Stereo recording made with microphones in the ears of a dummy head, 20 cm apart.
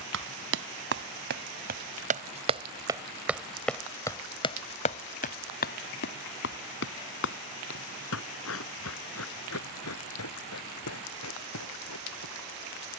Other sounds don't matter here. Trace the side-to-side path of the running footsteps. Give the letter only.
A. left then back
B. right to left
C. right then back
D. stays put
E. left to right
B.